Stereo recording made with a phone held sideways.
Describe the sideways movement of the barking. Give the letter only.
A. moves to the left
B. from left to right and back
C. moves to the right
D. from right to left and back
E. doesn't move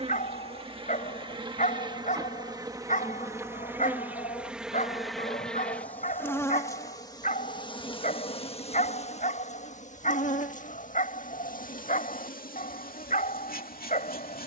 E.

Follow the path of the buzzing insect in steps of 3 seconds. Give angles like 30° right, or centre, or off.
30° right, 10° right, 30° left, 60° left, 70° left.